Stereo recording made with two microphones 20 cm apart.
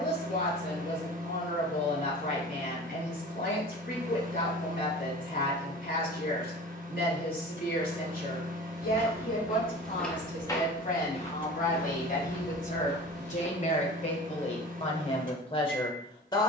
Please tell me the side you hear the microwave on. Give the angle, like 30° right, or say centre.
50° right.